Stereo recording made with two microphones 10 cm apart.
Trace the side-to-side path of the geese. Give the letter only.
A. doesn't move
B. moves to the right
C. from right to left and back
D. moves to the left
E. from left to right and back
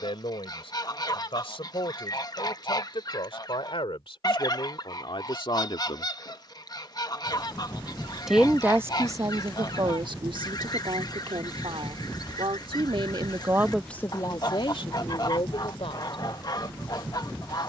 A.